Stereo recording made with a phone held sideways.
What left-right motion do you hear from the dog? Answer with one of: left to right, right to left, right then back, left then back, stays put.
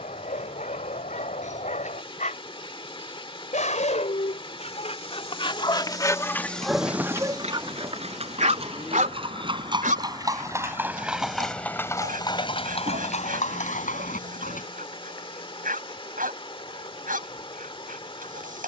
left to right.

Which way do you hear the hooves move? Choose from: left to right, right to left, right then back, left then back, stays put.
right to left.